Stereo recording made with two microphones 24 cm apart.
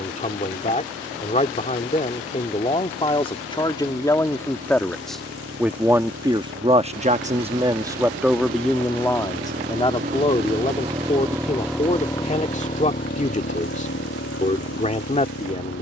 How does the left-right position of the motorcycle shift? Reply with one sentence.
You can hear the motorcycle travel towards the left.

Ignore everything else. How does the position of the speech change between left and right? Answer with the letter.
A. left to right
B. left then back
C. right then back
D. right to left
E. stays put
C.